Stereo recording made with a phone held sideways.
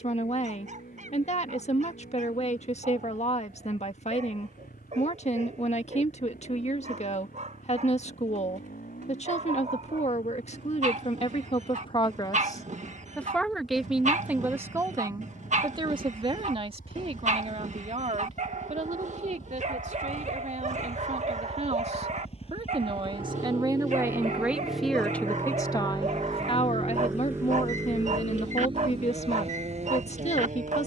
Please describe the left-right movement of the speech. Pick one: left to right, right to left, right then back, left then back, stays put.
right then back.